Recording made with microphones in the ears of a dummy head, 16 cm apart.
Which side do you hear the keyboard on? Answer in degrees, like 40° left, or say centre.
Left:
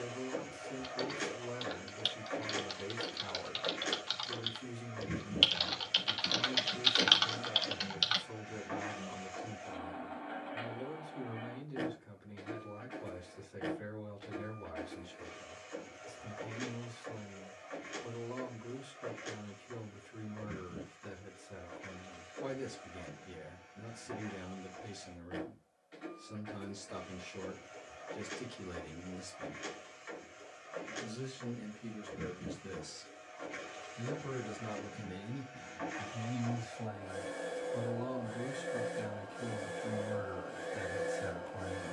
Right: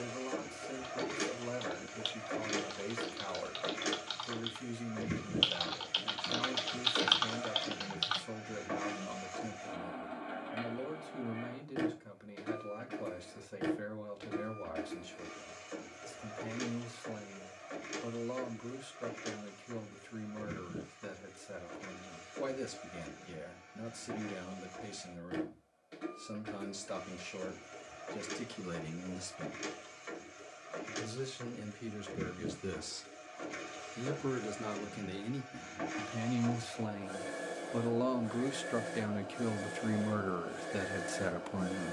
20° left.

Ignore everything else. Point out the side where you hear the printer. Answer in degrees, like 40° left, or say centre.
50° right.